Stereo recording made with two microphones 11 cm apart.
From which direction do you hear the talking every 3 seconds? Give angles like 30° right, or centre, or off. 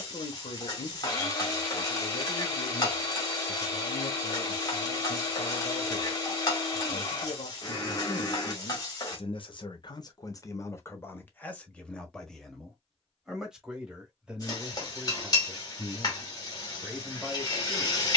70° left, 70° left, 70° left, 30° left, centre, 10° right.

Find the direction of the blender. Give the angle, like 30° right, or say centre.
30° left.